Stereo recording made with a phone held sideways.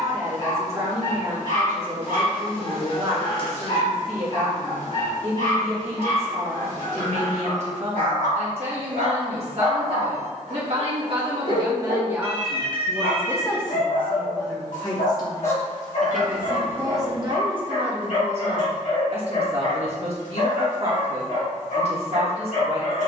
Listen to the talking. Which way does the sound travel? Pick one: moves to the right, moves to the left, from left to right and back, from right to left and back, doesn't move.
from right to left and back.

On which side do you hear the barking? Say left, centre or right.
left.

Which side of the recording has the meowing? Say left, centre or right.
left.